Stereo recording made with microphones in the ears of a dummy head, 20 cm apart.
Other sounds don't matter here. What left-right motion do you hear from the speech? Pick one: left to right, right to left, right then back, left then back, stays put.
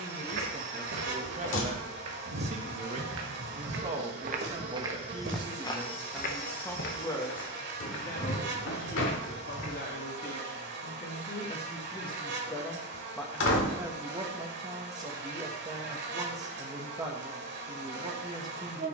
left then back.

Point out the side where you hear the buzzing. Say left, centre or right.
right.